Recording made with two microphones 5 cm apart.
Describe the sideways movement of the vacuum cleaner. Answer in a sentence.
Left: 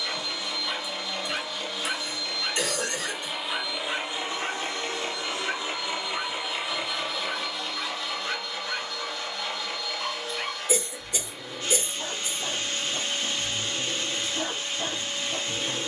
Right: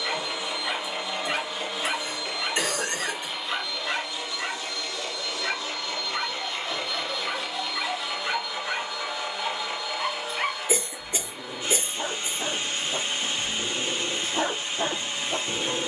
In this clip you hear the vacuum cleaner move from right to left and back again.